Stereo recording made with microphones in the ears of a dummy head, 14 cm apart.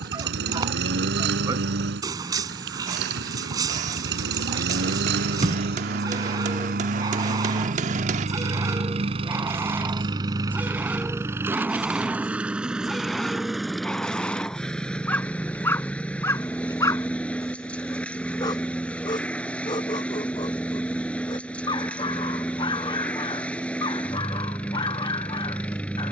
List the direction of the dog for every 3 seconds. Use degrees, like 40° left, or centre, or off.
20° right, 20° right, 20° right, 10° right, centre, 20° left, 30° left, 30° left, 30° left.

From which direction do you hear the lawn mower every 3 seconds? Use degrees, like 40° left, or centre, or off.
70° right, 70° right, 50° right, 20° right, centre, 10° left, 10° left, 10° left, 10° left.